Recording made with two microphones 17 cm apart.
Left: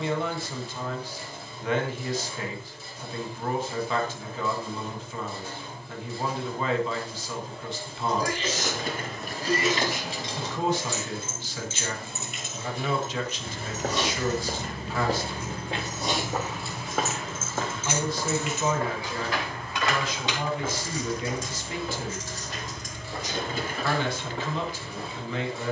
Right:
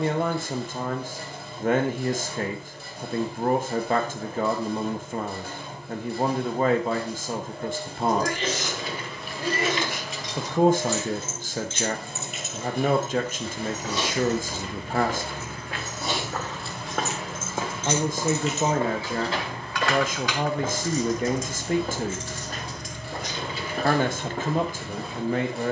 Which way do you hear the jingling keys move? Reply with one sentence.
In this clip you hear the jingling keys move from left to right and back again.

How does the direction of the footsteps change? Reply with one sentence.
You can hear the footsteps move to the right.